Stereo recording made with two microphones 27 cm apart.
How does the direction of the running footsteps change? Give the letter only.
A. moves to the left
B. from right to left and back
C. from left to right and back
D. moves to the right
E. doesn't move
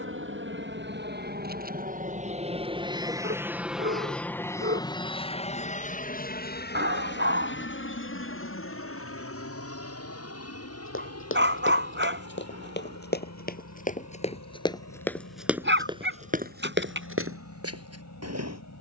D.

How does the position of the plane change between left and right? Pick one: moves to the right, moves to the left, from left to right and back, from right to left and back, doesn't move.
moves to the left.